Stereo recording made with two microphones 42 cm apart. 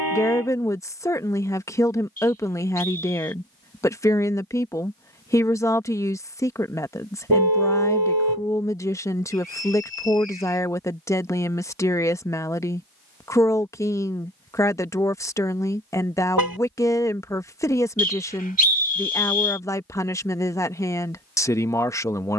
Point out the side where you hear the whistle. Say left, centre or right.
right.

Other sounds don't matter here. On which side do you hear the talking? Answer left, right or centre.
centre.